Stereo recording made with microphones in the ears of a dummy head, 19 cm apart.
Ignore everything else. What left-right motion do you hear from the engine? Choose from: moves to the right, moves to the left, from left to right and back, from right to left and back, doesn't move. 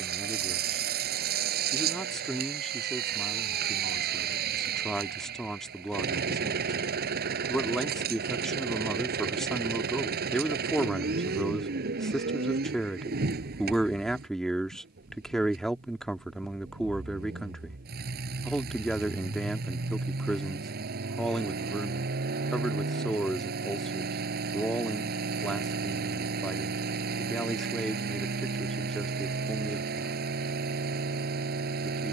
doesn't move.